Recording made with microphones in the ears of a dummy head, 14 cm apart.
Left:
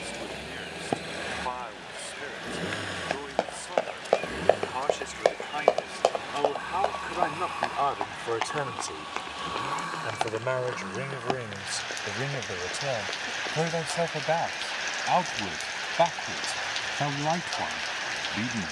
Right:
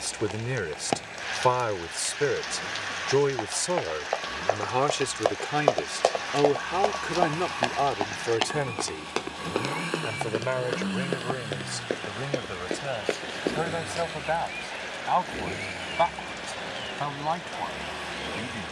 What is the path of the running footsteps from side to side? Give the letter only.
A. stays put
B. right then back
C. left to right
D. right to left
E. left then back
C.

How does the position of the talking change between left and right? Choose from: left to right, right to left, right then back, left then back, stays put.
right to left.